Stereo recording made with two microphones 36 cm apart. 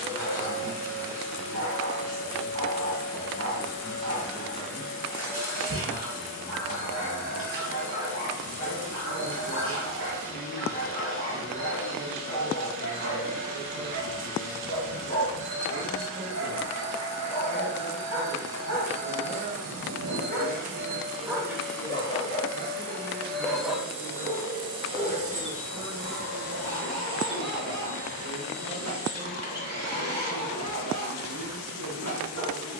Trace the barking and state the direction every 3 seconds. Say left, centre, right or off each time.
right, right, right, right, right, right, right, centre, right, right, right.